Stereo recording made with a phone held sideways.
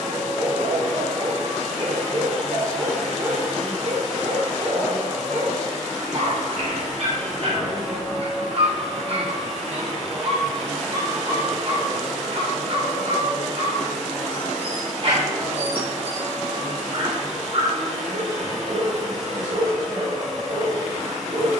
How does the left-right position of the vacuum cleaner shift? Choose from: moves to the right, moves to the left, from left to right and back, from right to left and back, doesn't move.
doesn't move.